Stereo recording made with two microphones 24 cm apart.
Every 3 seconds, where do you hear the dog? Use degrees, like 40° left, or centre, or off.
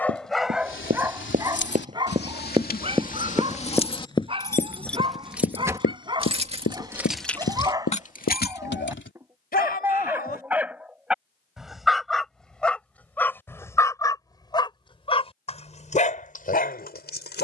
10° right, 20° right, 20° right, 10° right, 10° left, 40° left.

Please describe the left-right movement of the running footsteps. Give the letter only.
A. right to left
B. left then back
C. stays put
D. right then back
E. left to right
A.